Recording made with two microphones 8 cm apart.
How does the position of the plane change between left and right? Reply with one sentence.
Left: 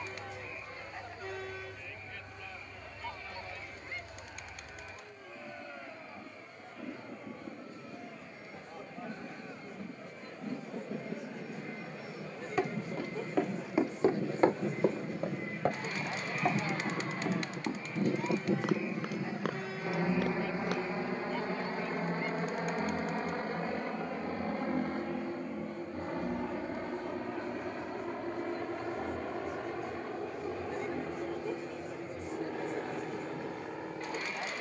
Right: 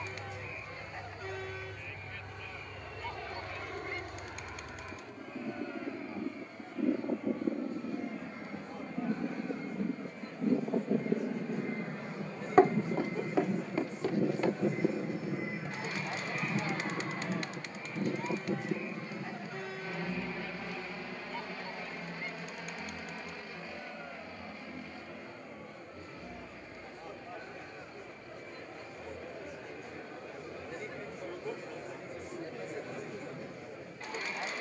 In this clip you hear the plane travel towards the left.